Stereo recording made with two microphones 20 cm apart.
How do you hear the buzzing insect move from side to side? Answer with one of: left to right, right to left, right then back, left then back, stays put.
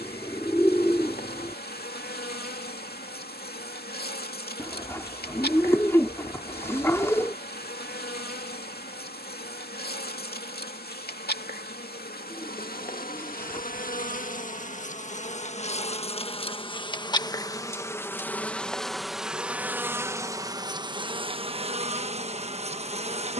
left to right.